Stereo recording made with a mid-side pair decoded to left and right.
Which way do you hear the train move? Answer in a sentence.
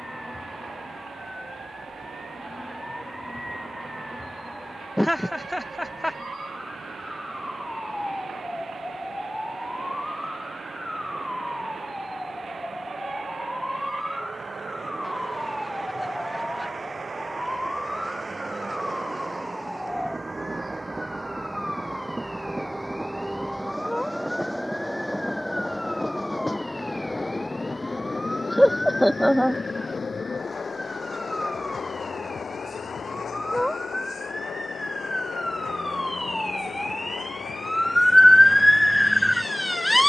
You can hear the train move from right to left.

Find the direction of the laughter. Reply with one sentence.
In this clip you hear the laughter in the centre.